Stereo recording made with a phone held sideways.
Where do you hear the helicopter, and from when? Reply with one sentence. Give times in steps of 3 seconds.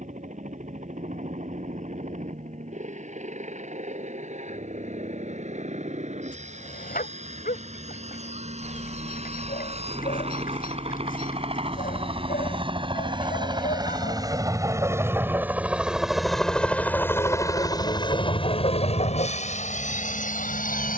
In this clip you hear the helicopter on the right from 0 s, in the centre from 15 s and on the left from 18 s.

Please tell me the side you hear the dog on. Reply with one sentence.
You can hear the dog on the left.